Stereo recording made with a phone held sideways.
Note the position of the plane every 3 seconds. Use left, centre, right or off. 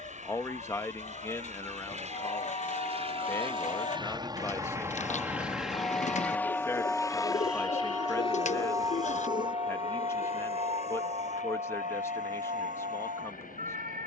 right, right, left, left, left.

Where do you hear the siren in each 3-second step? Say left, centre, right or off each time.
left, left, centre, right, right.